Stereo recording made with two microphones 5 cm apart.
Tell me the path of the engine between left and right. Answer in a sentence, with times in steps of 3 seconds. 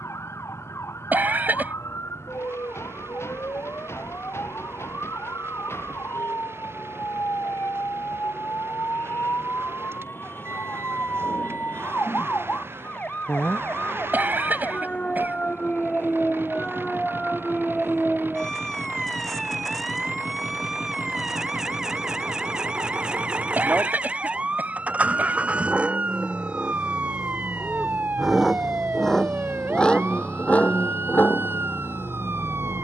You can hear the engine on the right from 0 s, in the centre from 27 s and on the left from 30 s.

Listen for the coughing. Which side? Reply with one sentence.
You can hear the coughing on the right.